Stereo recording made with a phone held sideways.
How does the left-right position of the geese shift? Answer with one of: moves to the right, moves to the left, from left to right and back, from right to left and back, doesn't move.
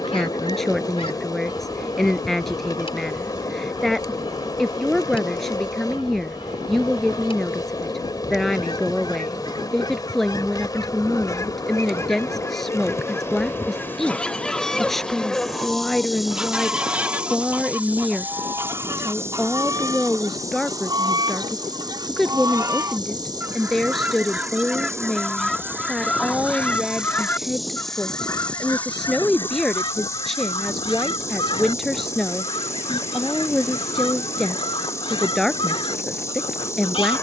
from left to right and back.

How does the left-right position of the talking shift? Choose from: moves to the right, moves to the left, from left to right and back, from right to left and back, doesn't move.
doesn't move.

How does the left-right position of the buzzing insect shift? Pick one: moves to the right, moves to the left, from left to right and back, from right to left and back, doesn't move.
from left to right and back.